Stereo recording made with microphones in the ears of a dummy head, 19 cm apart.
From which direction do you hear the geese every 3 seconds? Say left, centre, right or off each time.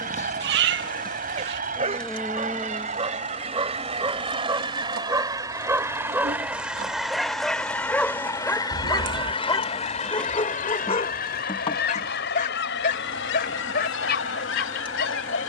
right, right, centre, left, left.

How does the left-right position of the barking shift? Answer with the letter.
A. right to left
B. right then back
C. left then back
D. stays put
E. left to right
A.